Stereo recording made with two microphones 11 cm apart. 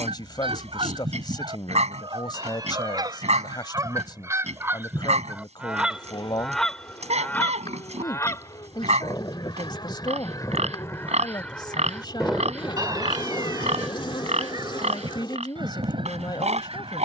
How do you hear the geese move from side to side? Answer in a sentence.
You can hear the geese go left and come back.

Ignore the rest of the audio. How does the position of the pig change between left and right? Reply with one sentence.
In this clip you hear the pig stay put.